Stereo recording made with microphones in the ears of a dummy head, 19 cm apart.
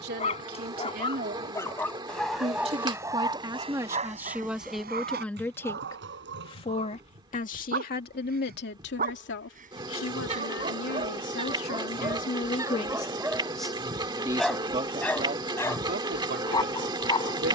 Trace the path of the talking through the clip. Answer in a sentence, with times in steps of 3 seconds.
In this clip you hear the talking on the right from 0 s, in the centre from 3 s, on the left from 6 s, in the centre from 12 s and on the right from 15 s.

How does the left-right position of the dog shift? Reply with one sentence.
In this clip you hear the dog go right and come back.